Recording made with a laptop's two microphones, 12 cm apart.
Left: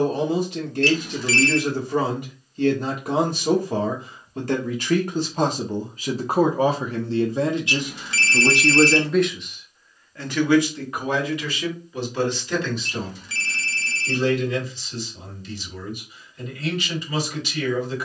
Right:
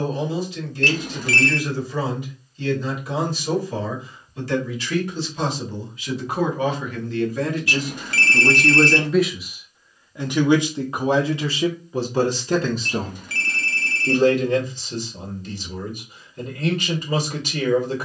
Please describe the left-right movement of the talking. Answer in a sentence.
You can hear the talking travel towards the right.